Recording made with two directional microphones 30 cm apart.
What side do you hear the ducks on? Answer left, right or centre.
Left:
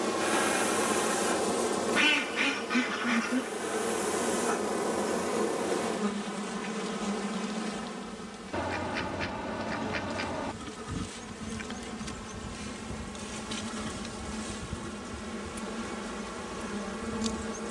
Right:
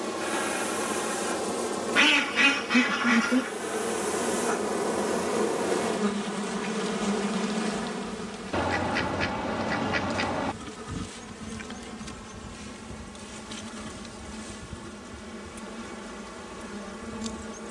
right.